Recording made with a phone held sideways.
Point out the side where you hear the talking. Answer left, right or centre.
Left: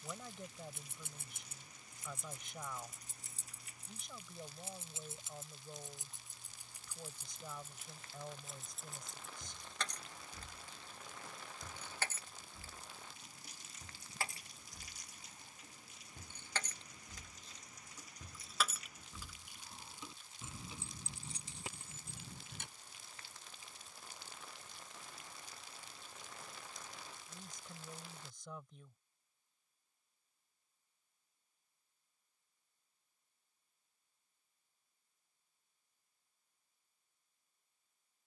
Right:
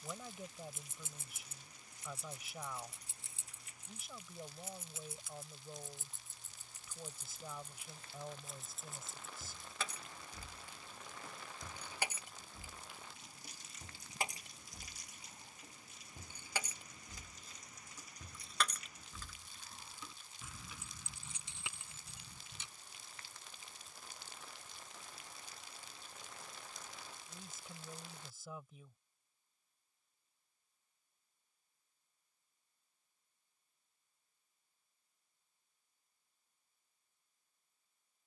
centre.